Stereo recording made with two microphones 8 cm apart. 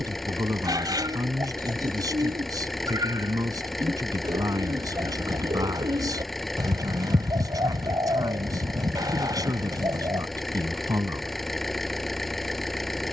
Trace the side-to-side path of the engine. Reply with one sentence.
You can hear the engine stay in one place.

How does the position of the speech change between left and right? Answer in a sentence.
You can hear the speech stay in one place.